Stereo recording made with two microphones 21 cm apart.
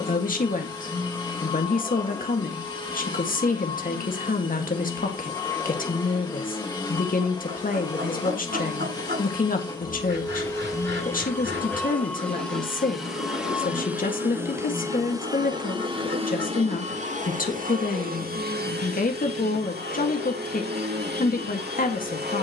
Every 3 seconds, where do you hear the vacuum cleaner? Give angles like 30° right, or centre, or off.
20° left, 20° left, 20° left, 10° left, centre, 30° right, 50° right, 50° right.